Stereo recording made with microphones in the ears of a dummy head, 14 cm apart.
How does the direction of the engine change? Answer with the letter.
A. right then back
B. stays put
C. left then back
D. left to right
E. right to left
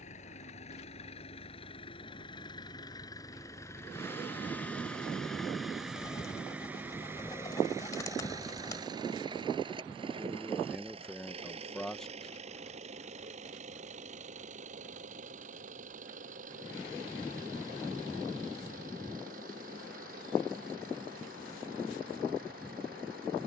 D.